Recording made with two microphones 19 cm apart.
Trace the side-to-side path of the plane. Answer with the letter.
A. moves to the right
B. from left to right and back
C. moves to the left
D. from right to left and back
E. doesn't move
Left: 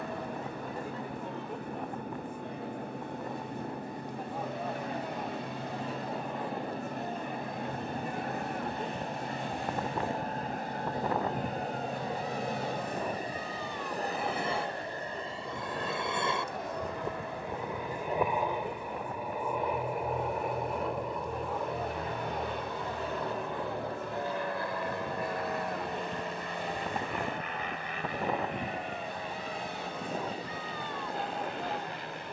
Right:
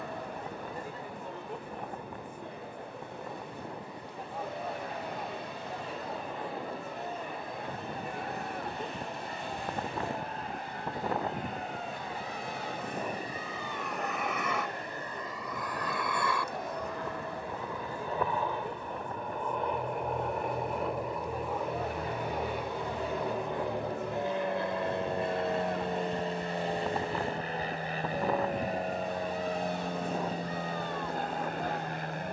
A.